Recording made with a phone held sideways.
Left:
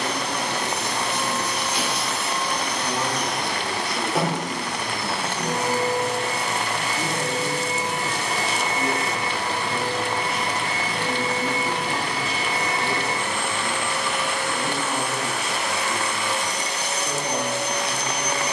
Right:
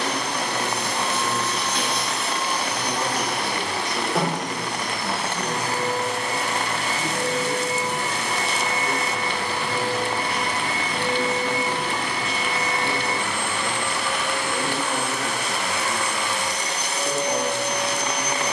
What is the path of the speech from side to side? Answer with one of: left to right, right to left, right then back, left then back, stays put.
left then back.